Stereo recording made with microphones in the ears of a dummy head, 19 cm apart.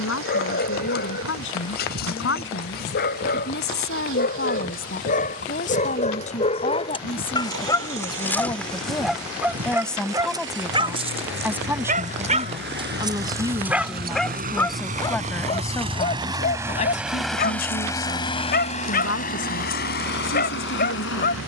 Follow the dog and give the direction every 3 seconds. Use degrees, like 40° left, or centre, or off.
50° left, 50° left, 20° left, 20° right, 20° right, 40° left, 50° left.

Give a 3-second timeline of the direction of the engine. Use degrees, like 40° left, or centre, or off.
70° right, 70° right, 70° right, 60° right, 50° right, 10° right, 40° left.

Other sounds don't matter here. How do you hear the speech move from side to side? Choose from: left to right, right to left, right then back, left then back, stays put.
right then back.